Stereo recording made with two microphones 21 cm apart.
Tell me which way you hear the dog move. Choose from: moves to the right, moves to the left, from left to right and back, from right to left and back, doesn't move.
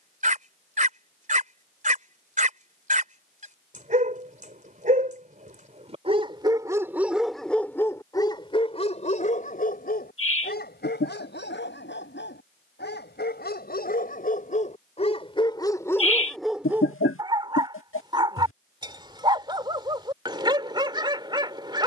from right to left and back.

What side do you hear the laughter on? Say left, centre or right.
left.